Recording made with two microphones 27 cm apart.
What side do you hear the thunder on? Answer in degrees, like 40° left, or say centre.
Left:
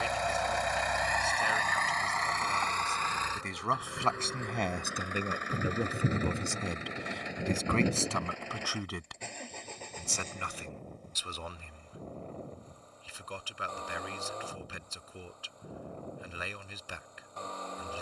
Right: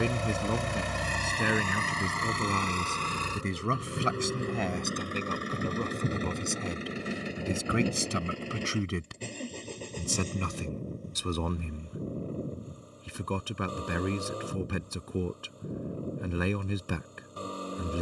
10° left.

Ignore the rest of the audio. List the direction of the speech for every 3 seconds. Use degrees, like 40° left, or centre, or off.
60° right, 10° right, 10° right, 50° right, 60° right, 60° right.